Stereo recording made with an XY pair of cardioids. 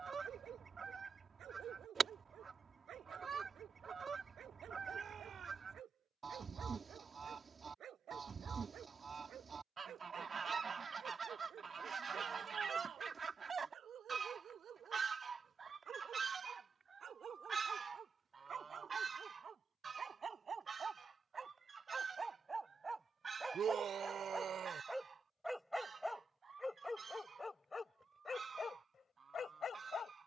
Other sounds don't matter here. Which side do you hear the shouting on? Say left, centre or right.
right.